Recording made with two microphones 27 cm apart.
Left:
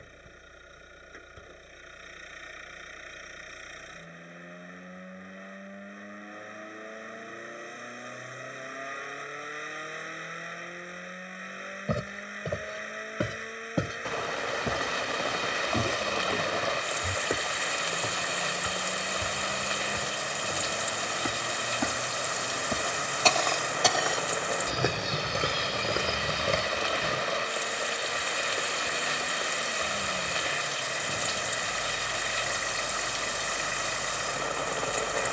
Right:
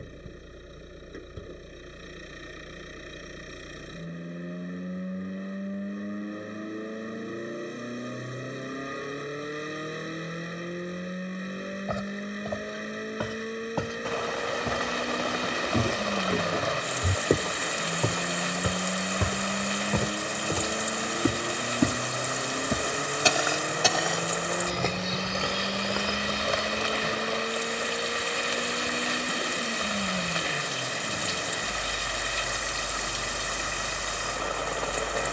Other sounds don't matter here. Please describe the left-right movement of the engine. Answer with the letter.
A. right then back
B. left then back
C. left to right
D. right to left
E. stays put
E.